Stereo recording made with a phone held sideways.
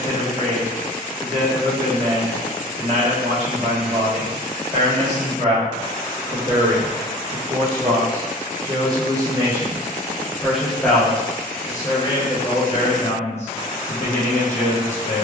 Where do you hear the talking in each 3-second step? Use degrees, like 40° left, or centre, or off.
50° right, 50° right, 40° right, centre, 40° left.